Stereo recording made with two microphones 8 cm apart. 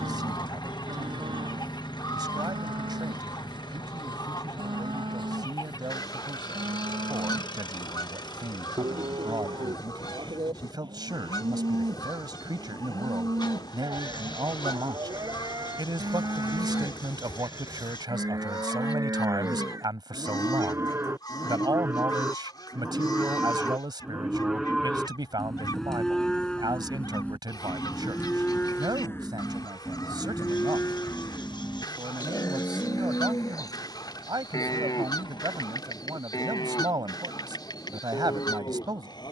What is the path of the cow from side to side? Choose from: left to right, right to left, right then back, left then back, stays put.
right to left.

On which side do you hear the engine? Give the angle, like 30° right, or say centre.
60° left.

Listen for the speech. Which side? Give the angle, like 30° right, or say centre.
60° right.